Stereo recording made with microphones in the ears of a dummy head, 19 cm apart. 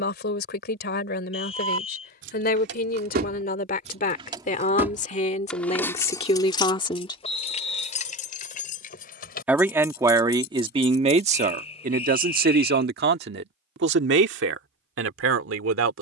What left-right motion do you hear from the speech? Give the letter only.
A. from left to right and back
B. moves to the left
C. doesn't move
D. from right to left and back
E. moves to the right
E.